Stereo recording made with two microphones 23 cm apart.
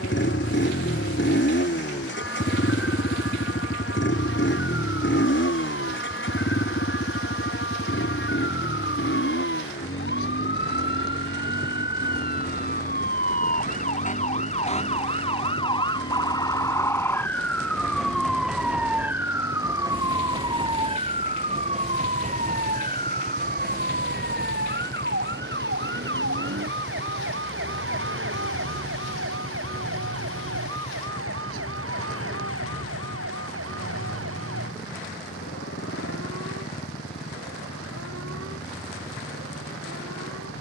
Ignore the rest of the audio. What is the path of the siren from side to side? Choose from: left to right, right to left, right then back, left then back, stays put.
left to right.